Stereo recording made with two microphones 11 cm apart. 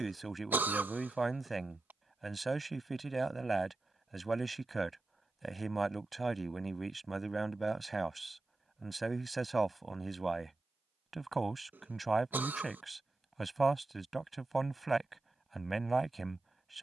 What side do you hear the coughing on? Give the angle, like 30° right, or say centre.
20° right.